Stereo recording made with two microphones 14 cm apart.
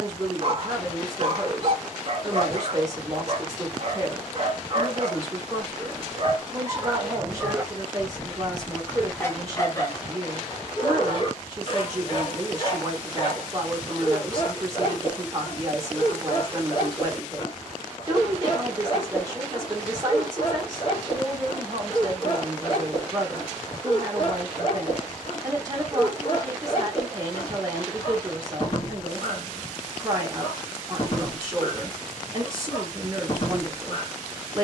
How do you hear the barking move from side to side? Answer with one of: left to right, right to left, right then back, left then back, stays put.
right to left.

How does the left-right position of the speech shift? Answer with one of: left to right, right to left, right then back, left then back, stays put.
stays put.